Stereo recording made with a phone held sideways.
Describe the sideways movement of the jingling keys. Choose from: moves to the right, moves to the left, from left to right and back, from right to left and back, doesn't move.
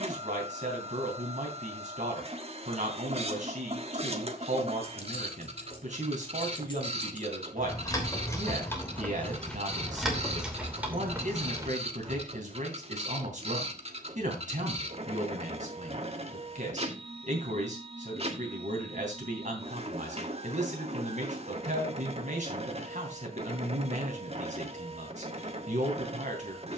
moves to the right.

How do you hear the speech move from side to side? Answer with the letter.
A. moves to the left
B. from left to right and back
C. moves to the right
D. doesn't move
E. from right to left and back
D.